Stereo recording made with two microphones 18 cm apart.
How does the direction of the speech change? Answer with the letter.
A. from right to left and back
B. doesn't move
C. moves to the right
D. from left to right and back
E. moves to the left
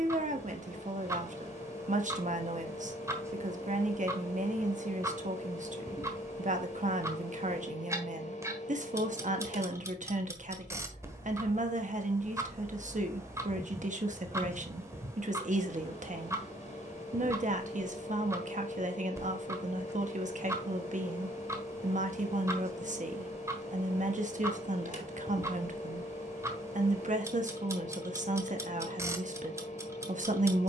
B.